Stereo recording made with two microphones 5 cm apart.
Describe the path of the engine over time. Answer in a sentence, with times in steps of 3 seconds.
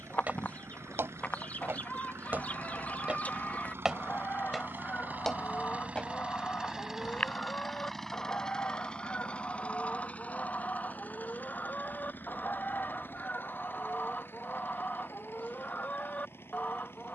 In this clip you hear the engine on the right from 0 s, in the centre from 6 s and on the left from 9 s.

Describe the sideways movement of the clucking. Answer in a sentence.
You can hear the clucking stay in one place.